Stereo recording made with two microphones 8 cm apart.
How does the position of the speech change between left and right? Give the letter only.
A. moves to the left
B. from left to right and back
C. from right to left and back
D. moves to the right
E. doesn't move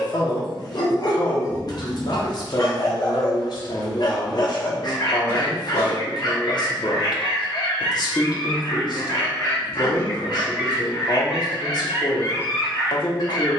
E.